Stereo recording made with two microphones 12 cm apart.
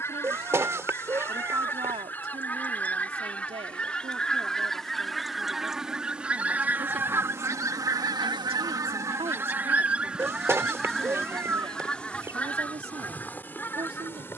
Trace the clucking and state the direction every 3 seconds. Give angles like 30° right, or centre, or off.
20° left, 10° left, 20° right, 10° right, 20° left.